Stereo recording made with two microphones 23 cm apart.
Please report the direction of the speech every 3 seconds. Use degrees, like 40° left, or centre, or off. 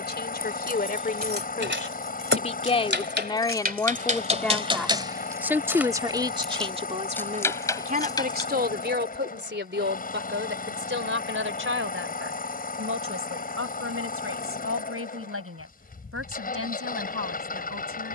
40° left, 10° left, 30° right, 60° right, 70° right, 70° right.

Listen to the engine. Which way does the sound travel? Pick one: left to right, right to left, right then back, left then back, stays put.
stays put.